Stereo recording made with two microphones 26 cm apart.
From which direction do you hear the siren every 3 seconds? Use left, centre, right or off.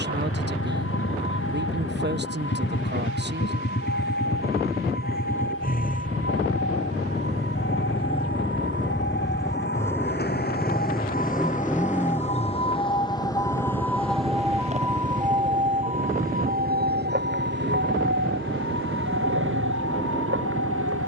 left, left, left, left, centre, right, right.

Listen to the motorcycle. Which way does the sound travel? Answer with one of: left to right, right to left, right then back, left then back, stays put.
left to right.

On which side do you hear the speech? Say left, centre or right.
right.